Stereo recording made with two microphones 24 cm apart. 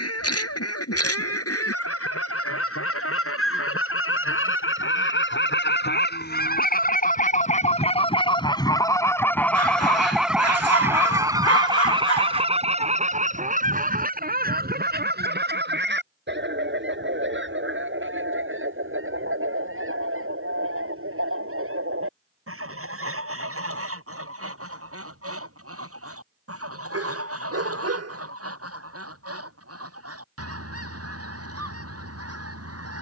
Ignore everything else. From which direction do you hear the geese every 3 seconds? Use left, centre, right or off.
left, left, left, centre, right, right, right, right, right, right, right.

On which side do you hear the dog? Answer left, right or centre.
right.